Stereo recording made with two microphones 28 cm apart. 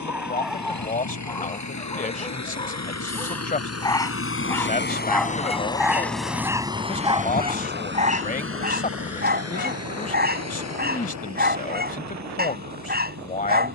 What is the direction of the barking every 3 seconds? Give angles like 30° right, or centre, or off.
10° left, 10° left, 20° right, 30° right, 30° right.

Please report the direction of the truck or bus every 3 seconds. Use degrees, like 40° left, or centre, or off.
70° left, 40° left, 30° right, 60° right, 70° right.